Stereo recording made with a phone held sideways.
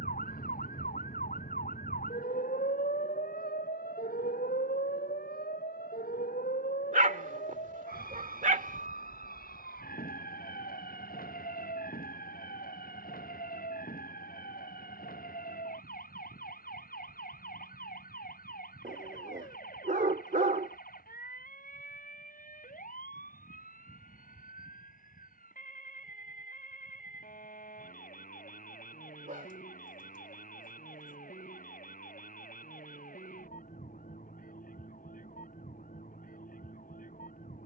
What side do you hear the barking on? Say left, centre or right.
right.